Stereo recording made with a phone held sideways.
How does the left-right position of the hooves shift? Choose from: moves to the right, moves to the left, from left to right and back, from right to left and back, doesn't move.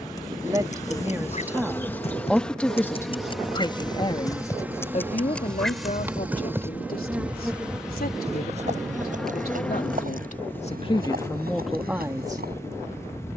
moves to the right.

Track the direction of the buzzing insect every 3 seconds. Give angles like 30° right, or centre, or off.
20° left, 10° right, 10° right, 10° left, 20° left.